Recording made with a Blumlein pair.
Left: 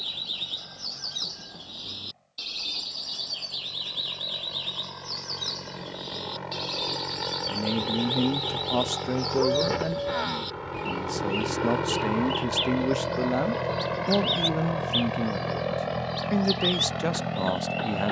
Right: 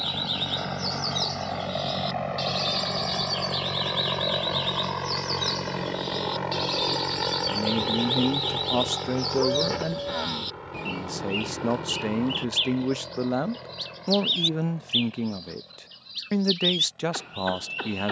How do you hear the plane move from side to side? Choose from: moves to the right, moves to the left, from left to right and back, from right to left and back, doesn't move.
moves to the left.